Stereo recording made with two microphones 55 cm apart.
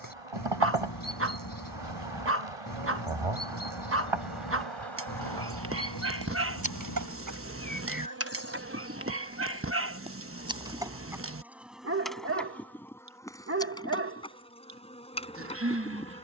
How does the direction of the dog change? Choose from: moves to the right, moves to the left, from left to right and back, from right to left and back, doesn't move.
doesn't move.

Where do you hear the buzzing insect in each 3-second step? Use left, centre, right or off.
right, right, right, centre, centre, centre.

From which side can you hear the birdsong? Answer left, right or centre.
left.